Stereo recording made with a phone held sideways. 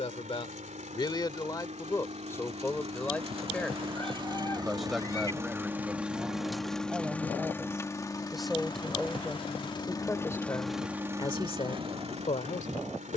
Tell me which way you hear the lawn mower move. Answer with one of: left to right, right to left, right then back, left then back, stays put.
left then back.